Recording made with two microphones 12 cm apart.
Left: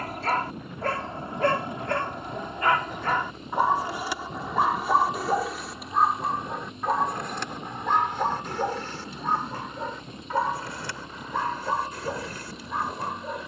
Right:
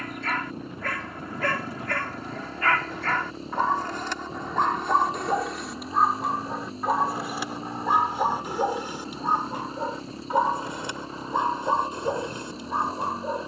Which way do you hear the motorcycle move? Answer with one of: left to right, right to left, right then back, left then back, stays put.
stays put.